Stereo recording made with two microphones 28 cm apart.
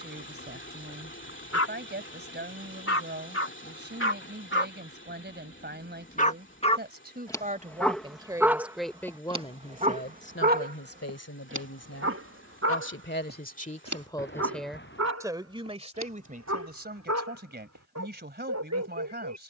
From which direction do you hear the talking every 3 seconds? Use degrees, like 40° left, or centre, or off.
40° right, 40° right, 20° right, 40° left, 30° left, 30° right, 40° right.